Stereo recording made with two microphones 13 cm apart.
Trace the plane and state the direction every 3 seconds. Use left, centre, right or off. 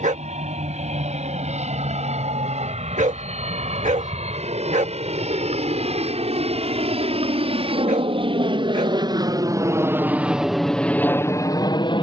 right, right, right, centre.